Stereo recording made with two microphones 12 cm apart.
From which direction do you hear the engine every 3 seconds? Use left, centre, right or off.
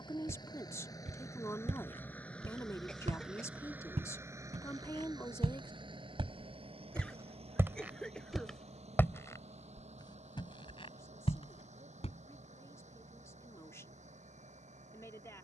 left, right, right, right, right.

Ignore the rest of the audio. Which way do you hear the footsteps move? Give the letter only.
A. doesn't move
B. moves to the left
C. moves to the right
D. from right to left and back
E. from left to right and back
B.